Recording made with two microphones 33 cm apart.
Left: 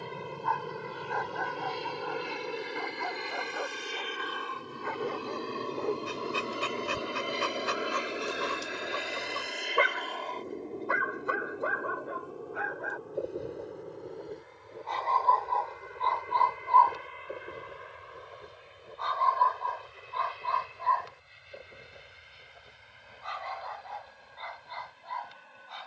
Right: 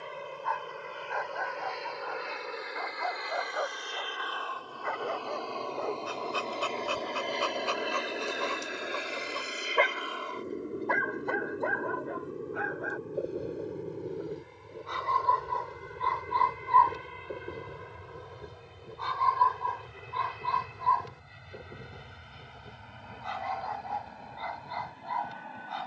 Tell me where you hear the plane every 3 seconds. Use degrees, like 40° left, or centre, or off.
50° left, 30° left, 10° left, 10° right, 30° right, 40° right, 50° right, 60° right, 60° right.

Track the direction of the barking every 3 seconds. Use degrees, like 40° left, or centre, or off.
40° left, 40° left, 30° left, 10° left, 10° right, 20° right, 40° right, 50° right, 60° right.